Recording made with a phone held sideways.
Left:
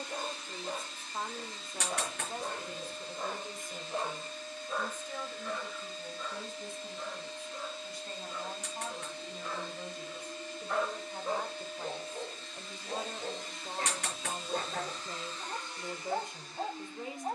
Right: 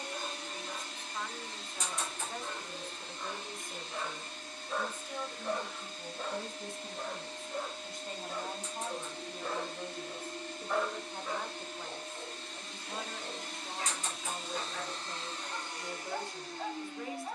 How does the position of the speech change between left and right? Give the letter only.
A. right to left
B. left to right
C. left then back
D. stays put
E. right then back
E.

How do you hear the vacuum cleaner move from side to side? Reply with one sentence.
You can hear the vacuum cleaner stay in one place.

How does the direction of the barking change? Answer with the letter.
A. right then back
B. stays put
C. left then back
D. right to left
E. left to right
A.